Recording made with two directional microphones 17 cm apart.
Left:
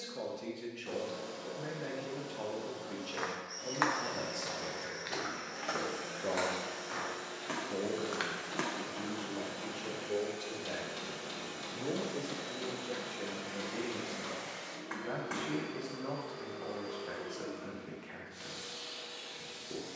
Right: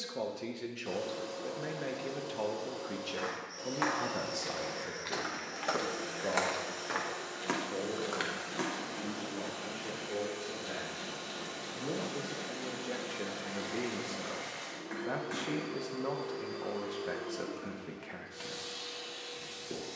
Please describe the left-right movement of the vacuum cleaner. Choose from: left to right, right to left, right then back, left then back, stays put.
stays put.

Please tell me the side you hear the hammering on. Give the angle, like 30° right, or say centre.
20° left.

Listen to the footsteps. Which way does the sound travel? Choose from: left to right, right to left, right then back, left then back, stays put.
right then back.